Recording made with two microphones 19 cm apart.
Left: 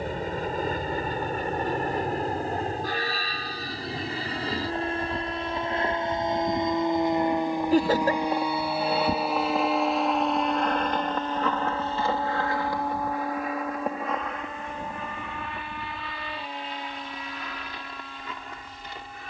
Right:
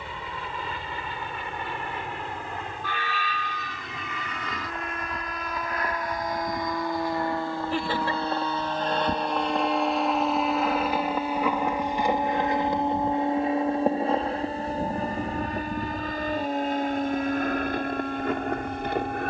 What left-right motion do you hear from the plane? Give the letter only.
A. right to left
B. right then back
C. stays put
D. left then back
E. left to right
E.